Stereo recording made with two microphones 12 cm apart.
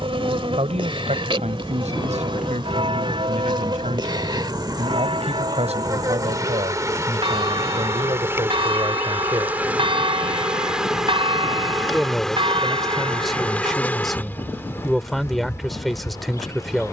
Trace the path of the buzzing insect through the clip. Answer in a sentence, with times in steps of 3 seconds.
You can hear the buzzing insect on the right from 0 s, in the centre from 9 s and on the left from 15 s.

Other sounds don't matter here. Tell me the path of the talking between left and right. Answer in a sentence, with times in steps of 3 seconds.
You can hear the talking on the right from 0 s and in the centre from 12 s.